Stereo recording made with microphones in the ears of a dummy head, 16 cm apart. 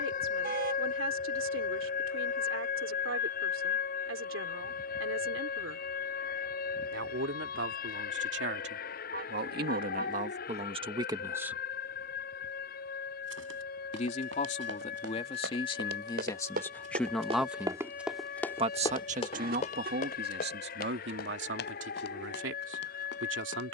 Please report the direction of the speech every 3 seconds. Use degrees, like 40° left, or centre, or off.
80° right, 80° right, 70° right, 40° right, 40° left, 20° left, 50° right, 70° right.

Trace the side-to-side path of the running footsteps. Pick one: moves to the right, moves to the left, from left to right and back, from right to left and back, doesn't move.
moves to the left.